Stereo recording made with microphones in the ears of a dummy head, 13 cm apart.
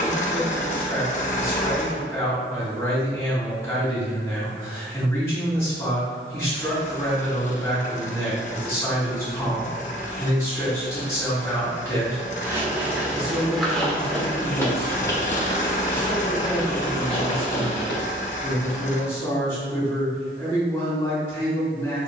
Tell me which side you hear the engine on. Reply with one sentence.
You can hear the engine on the left.